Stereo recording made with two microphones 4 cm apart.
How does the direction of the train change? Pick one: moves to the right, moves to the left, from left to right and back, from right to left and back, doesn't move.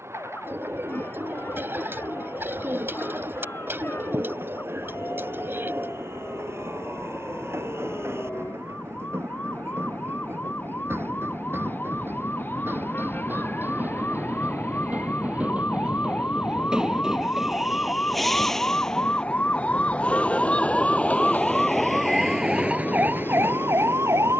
moves to the left.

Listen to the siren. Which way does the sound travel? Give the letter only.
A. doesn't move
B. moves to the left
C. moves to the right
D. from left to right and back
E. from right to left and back
C.